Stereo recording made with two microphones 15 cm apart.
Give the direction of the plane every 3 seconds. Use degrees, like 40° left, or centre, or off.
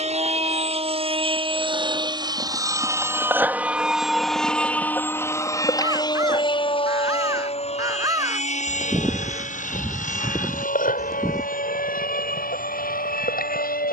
40° right, centre, 40° left, 60° left, 70° left.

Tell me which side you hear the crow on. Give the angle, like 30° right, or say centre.
20° right.